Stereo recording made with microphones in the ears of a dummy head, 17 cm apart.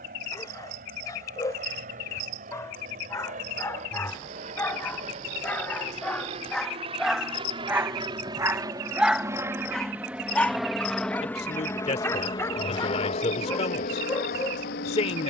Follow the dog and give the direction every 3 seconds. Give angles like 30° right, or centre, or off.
20° left, 10° left, centre, 10° left, 20° left.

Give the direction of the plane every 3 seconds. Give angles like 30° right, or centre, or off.
50° right, 40° right, 30° right, centre, 40° left.